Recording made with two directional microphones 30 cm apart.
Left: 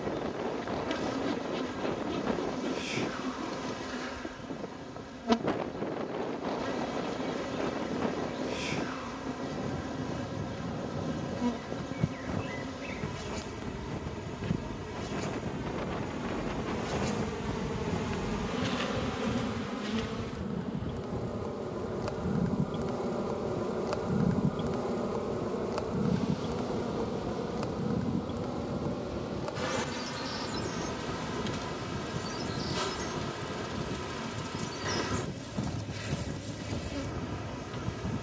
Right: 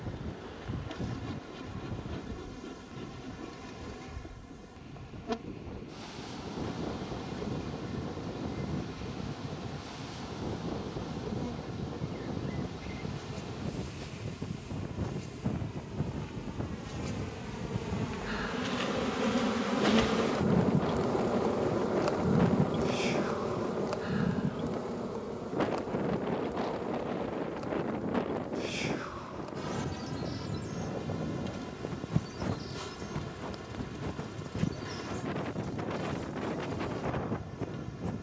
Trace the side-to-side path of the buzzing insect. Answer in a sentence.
You can hear the buzzing insect move from left to right and back again.